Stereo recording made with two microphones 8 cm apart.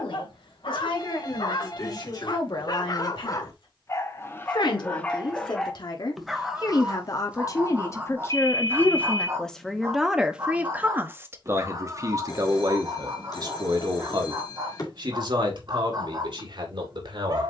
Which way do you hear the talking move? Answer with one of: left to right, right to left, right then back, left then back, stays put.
left to right.